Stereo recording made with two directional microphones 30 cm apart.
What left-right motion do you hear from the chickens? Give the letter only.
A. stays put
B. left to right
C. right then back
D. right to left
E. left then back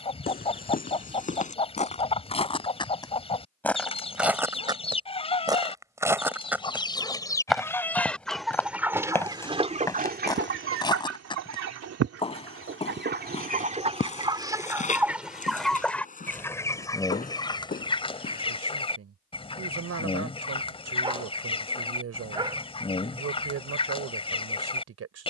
C.